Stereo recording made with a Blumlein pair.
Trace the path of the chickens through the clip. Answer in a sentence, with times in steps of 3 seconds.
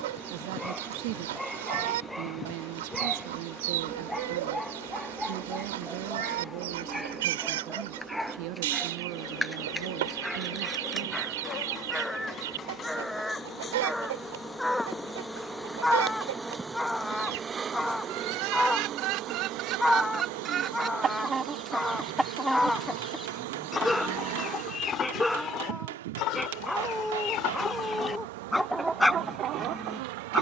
In this clip you hear the chickens on the right from 0 s, in the centre from 21 s, on the left from 24 s and in the centre from 27 s.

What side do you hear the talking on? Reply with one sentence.
In this clip you hear the talking on the right.